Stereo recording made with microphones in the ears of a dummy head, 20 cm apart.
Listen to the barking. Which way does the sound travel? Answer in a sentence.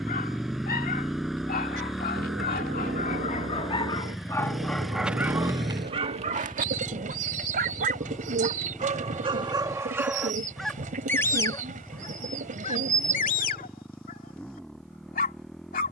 You can hear the barking go right and come back.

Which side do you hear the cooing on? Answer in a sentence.
You can hear the cooing on the right.